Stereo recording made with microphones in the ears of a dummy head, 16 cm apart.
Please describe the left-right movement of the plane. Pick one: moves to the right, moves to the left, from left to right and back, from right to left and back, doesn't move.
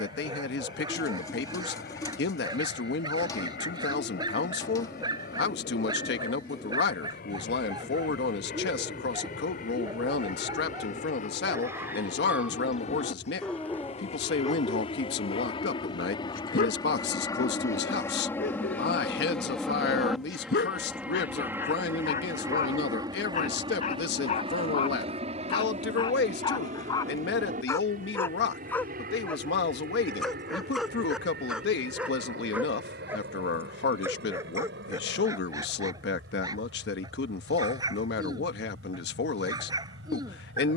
moves to the right.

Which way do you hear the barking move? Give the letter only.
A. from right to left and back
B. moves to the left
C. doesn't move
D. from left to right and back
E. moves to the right
A.